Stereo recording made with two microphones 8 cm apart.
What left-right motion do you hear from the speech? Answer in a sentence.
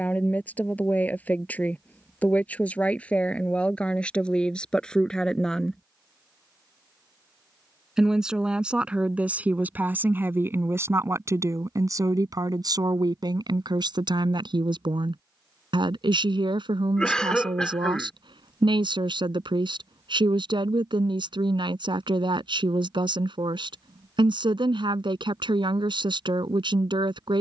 You can hear the speech travel towards the right.